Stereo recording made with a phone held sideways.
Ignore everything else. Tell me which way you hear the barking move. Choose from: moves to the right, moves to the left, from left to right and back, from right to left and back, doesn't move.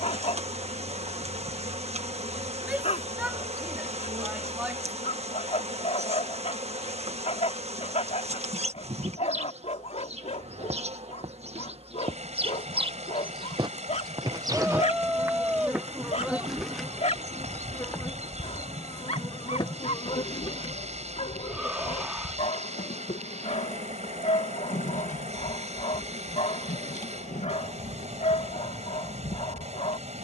doesn't move.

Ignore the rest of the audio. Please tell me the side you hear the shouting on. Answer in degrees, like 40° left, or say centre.
10° right.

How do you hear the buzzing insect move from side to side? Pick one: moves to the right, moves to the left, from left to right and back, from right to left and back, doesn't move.
moves to the left.